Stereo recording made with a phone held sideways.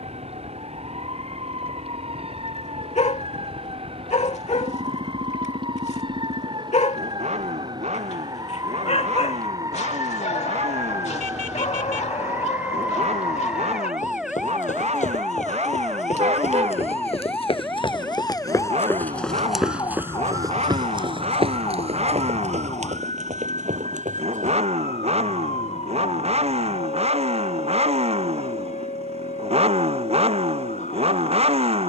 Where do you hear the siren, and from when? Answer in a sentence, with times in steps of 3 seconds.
In this clip you hear the siren on the right from 0 s, in the centre from 12 s and on the left from 18 s.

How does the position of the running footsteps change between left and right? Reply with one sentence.
You can hear the running footsteps travel towards the right.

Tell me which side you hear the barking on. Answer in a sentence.
You can hear the barking on the left.